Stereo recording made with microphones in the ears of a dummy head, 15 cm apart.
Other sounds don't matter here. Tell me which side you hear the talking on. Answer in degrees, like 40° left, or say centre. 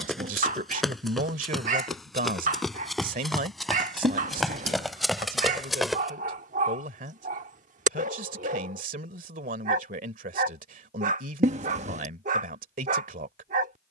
50° right.